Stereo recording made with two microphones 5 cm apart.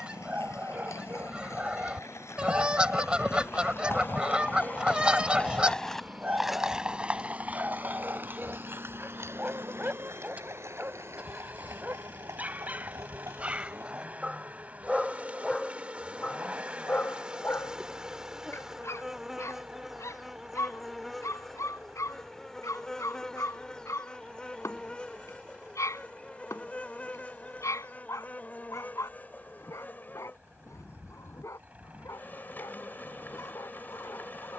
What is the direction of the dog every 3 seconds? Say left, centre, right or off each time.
right, right, right, right, right, left, left, left, left, left, left, left.